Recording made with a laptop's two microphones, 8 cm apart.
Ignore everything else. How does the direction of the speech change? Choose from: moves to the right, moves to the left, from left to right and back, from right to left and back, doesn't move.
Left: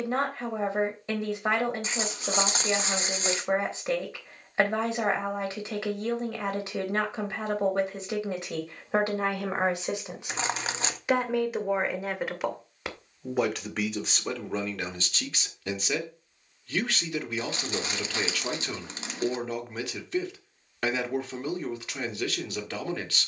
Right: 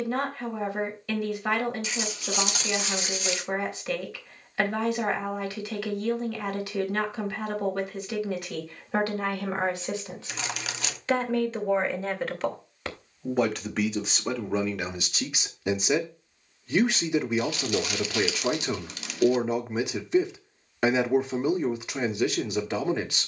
moves to the right.